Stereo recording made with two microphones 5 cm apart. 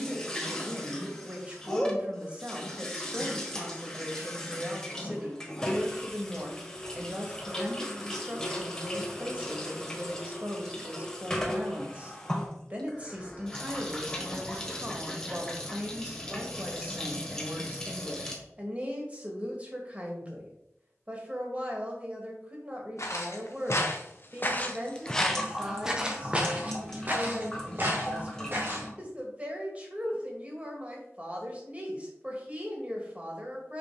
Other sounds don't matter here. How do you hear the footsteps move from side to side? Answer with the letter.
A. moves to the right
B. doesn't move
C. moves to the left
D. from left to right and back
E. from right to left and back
A.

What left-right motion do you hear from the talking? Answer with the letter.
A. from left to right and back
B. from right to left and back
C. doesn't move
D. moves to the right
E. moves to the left
C.